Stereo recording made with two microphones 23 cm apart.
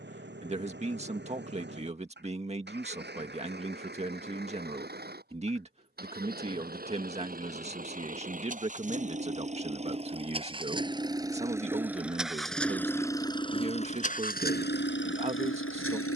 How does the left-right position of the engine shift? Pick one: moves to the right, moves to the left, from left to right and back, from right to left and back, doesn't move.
moves to the left.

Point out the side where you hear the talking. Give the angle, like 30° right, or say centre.
30° right.